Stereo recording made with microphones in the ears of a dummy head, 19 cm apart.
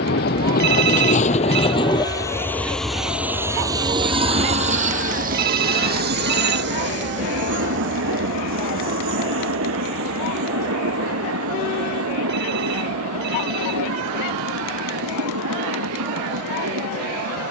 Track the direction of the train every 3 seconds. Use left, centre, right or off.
left, right, right, right, right, right.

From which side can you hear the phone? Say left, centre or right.
right.